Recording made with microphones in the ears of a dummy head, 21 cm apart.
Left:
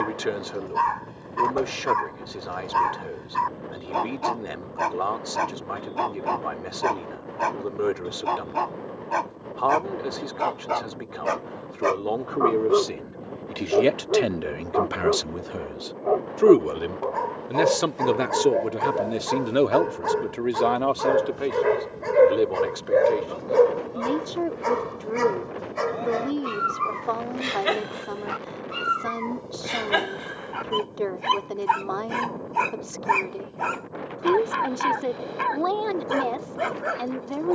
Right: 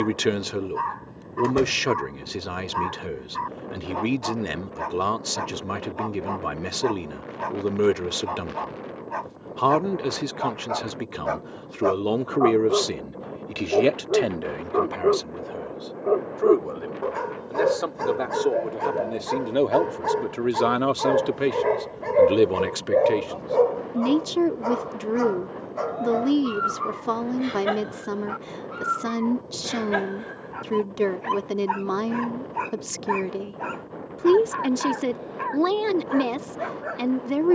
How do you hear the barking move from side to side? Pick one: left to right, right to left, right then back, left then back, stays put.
right then back.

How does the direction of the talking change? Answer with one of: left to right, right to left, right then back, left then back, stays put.
left then back.